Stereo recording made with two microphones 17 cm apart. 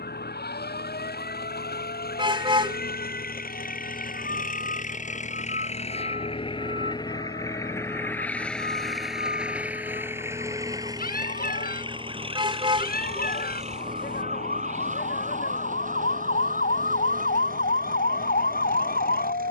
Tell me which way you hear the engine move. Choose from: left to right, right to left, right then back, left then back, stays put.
left to right.